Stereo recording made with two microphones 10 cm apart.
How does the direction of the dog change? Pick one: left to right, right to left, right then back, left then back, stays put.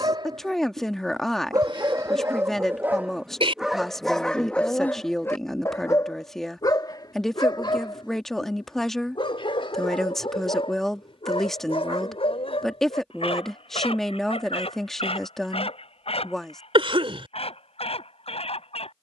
right to left.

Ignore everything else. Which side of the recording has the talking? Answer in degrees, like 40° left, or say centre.
centre.